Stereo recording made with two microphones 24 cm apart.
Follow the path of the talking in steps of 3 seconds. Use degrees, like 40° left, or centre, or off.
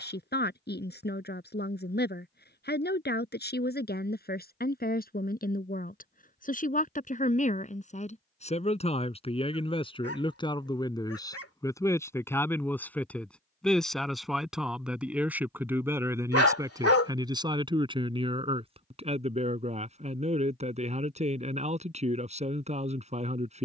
40° left, 40° left, 30° left, 20° left, centre, 10° right, 30° right, 30° right.